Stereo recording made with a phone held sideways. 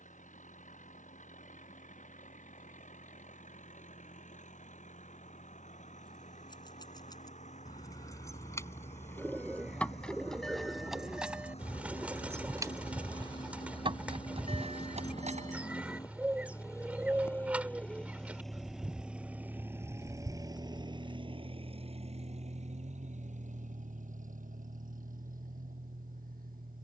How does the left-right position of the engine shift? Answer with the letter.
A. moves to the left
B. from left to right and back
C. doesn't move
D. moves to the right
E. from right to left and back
D.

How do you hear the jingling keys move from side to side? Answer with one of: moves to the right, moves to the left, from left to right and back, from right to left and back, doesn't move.
moves to the right.